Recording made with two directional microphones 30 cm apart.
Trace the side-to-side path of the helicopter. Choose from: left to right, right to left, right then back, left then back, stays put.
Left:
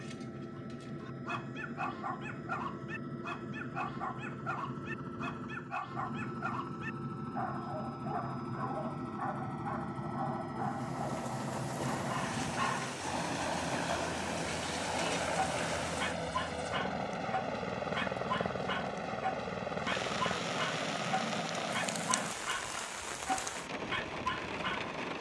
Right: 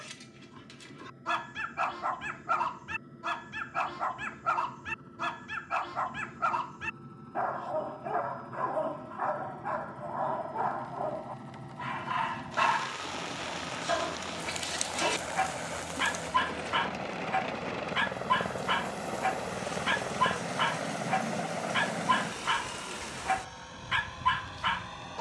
left to right.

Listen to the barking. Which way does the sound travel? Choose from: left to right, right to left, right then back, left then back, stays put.
stays put.